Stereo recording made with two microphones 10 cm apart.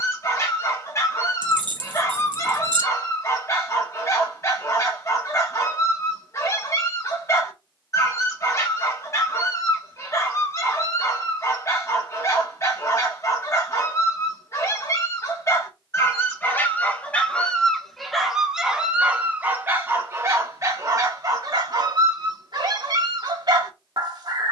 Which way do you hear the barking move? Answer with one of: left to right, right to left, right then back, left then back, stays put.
left to right.